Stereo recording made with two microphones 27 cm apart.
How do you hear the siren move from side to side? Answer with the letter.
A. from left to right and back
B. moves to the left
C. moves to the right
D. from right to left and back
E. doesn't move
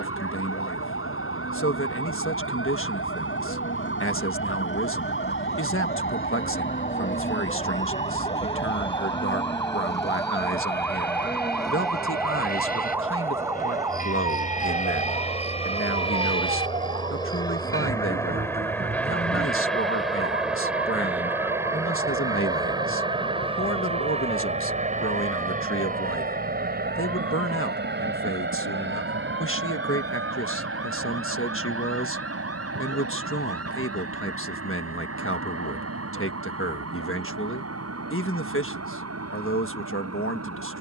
C.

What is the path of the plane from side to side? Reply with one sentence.
You can hear the plane travel towards the right.